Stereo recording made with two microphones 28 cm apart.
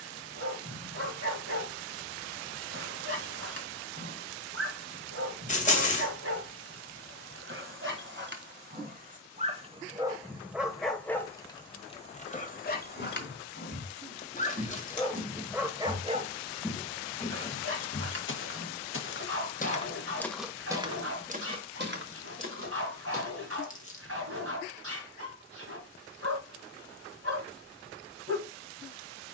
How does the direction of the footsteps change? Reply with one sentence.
In this clip you hear the footsteps go left and come back.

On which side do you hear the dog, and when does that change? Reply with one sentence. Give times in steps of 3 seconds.
In this clip you hear the dog on the right from 0 s, in the centre from 9 s, on the left from 12 s and on the right from 15 s.